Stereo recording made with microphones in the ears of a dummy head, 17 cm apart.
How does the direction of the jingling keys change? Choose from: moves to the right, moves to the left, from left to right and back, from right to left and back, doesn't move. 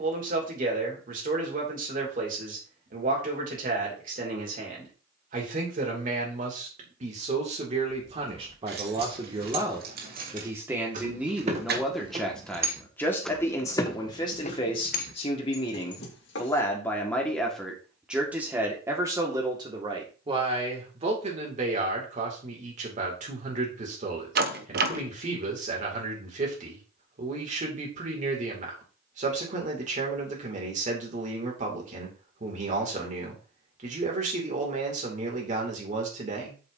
moves to the left.